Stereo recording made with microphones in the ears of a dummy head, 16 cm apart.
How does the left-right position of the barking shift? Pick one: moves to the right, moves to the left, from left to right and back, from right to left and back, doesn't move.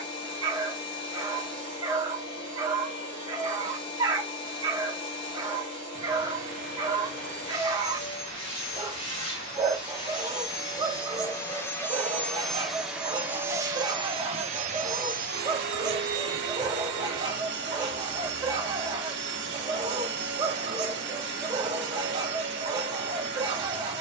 doesn't move.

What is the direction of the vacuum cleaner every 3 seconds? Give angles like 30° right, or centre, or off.
30° left, 30° left, 30° left, 20° left, 20° right, 60° right, 60° right, 60° right.